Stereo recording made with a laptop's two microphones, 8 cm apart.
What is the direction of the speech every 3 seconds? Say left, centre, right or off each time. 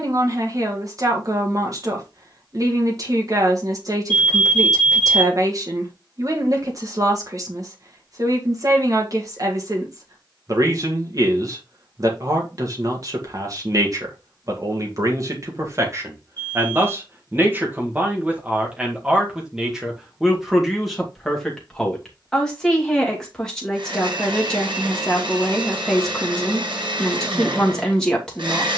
right, right, right, right, right, right, centre, centre, centre, centre.